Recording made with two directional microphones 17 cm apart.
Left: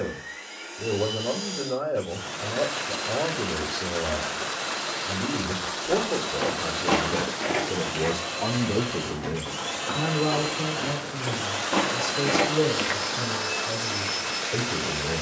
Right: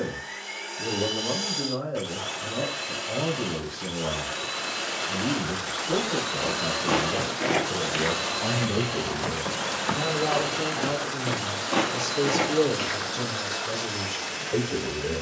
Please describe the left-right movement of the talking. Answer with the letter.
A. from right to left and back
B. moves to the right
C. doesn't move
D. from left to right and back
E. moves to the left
B.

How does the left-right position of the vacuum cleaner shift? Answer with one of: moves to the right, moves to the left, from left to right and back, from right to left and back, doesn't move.
moves to the left.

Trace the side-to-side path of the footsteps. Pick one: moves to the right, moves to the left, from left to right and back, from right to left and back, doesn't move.
from left to right and back.